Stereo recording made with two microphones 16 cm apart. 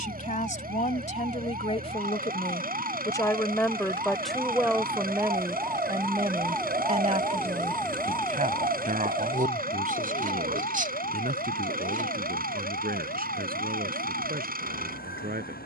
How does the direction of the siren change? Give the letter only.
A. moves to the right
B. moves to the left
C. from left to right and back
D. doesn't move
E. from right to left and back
B.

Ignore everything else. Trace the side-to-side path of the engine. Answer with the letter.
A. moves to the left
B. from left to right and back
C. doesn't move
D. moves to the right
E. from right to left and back
C.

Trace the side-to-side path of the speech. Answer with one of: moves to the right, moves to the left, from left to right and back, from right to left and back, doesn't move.
moves to the right.